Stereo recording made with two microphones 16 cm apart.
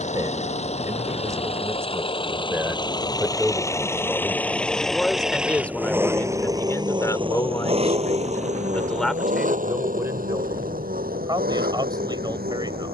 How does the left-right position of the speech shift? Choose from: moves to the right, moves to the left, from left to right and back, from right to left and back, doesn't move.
from right to left and back.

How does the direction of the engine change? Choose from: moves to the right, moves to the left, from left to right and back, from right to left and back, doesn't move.
moves to the right.